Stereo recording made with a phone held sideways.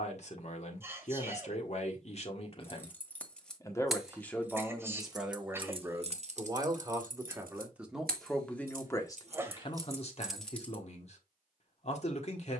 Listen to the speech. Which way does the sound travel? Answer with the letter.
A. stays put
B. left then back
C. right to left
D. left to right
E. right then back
E.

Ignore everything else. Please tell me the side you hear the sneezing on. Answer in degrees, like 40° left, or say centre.
20° right.